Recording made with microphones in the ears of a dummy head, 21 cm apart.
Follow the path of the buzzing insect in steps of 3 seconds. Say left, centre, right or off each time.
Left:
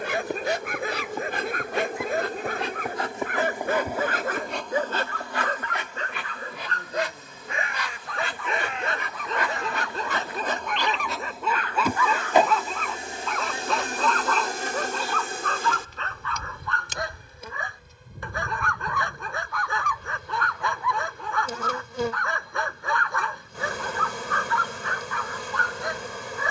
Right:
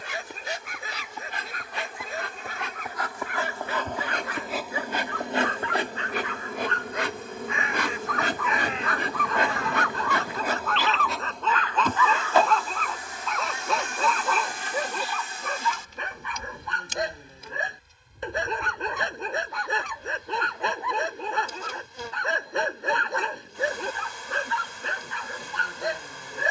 left, centre, right, centre, left, left, left, left, left.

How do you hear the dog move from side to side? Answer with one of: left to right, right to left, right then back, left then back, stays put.
left to right.